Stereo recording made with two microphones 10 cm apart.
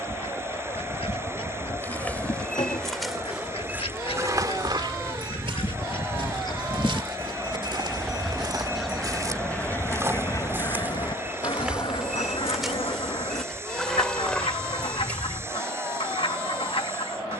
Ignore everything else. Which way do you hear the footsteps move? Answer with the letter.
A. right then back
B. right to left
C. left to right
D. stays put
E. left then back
A.